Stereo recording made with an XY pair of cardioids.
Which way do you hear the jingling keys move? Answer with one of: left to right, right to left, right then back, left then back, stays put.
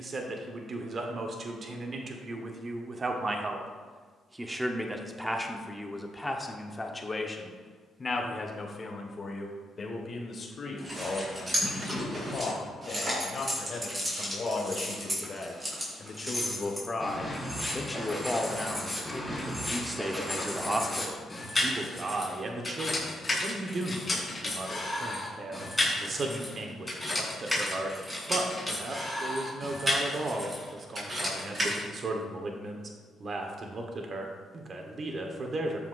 left then back.